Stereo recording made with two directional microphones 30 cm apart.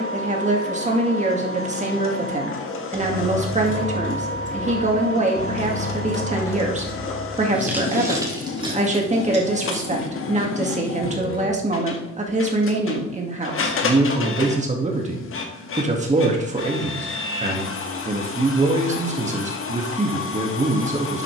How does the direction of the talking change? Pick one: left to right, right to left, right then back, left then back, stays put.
stays put.